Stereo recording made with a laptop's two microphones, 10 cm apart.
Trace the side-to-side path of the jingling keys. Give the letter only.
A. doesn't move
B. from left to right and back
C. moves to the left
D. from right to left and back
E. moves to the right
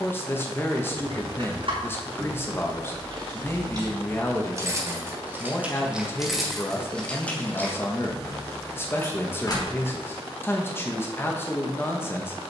C.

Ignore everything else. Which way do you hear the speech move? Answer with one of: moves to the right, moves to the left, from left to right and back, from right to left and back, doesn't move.
doesn't move.